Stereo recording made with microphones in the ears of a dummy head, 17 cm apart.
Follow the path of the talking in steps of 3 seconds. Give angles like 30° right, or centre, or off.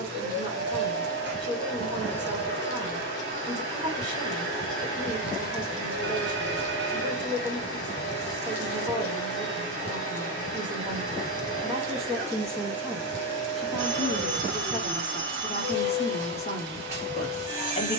20° right, 20° right, 20° right, 20° right, centre, 30° left.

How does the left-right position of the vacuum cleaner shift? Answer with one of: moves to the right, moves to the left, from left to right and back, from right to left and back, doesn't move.
doesn't move.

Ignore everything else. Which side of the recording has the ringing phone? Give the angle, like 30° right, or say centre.
60° right.